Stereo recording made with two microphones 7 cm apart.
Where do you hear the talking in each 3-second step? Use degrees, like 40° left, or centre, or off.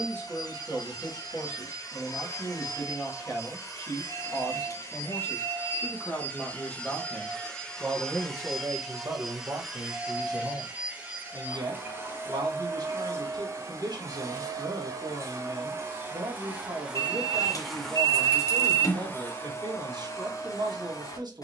30° left, 30° left, 10° right, 60° right, 70° right, 70° right, 70° right.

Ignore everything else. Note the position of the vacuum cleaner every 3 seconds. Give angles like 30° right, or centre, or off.
50° left, 40° left, 10° left, 10° right, 40° right, 20° right, 30° left.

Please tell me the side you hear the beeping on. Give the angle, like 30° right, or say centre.
50° left.